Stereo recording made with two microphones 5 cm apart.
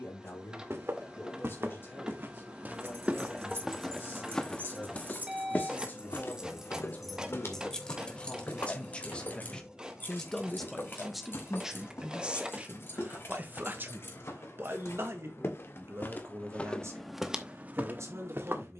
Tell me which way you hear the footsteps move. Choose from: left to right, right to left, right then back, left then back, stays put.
left then back.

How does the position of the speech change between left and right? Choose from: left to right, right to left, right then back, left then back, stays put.
left to right.